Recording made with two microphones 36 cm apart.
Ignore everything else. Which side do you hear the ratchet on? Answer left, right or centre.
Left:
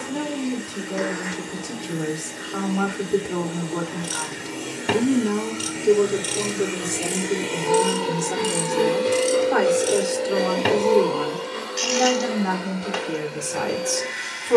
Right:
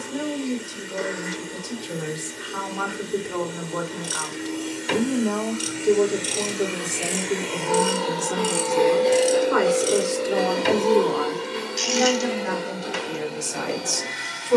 left.